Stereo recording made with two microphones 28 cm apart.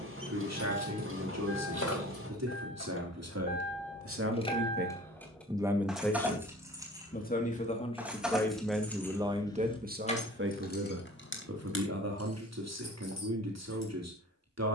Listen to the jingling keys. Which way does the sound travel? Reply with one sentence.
In this clip you hear the jingling keys go right and come back.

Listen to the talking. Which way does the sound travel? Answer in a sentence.
You can hear the talking go left and come back.